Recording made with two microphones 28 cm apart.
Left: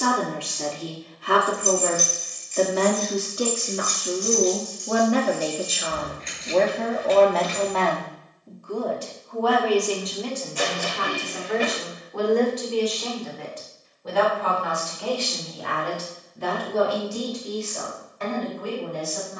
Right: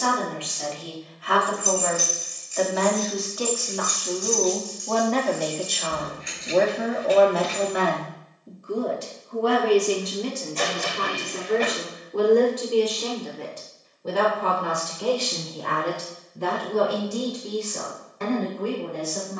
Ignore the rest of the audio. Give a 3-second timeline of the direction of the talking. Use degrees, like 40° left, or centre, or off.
50° left, 20° left, 10° right, 30° right, 50° right, 50° right, 60° right.